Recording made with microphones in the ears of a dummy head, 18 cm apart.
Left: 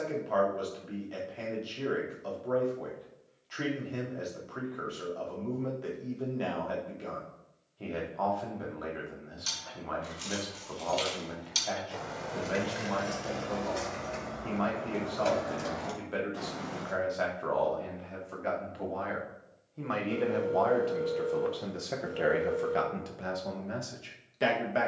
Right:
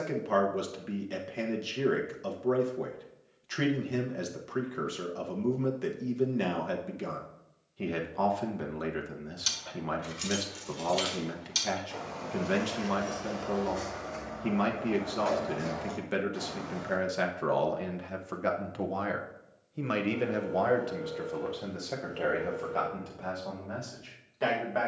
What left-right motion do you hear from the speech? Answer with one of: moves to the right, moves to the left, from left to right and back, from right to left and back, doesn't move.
moves to the left.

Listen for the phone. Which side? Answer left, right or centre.
left.